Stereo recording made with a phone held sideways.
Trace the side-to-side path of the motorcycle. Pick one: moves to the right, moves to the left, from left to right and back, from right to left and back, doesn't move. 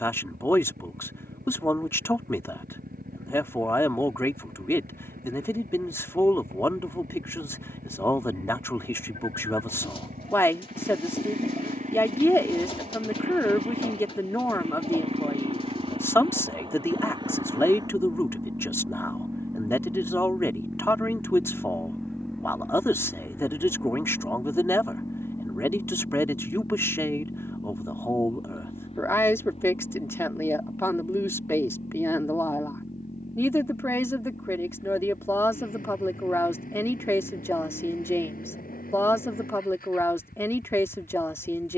moves to the left.